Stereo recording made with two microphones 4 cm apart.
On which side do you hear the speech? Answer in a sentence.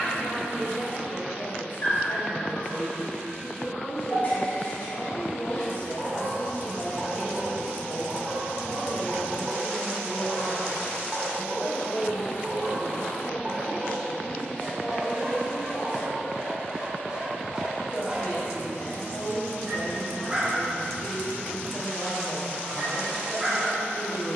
In this clip you hear the speech on the left.